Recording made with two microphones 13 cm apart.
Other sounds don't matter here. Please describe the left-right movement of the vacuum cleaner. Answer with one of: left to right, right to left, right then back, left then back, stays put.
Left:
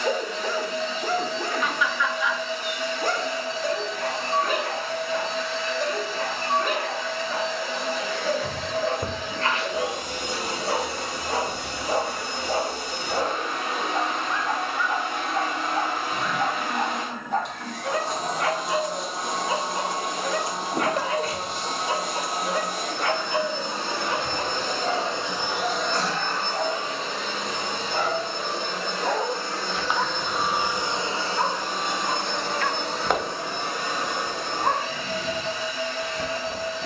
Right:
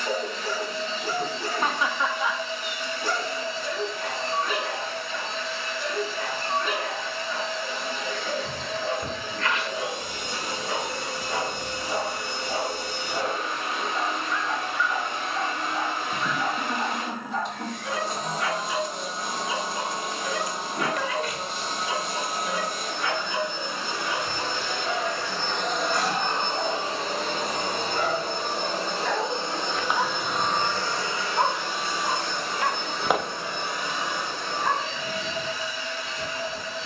right then back.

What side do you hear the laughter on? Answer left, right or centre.
right.